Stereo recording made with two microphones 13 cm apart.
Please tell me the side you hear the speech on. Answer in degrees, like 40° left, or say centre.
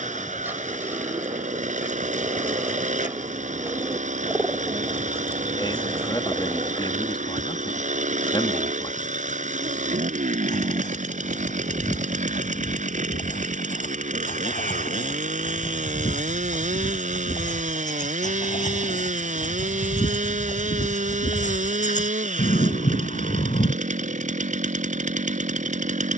40° left.